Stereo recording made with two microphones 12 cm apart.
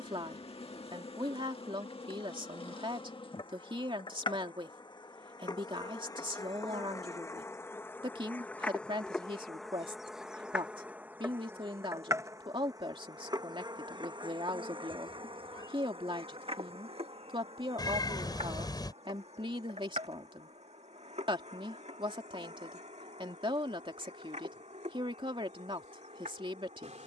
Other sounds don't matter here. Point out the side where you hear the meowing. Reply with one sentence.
You can hear the meowing on the left.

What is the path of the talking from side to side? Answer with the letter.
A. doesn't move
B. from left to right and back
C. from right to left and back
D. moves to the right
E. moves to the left
A.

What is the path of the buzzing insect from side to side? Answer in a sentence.
You can hear the buzzing insect move from left to right.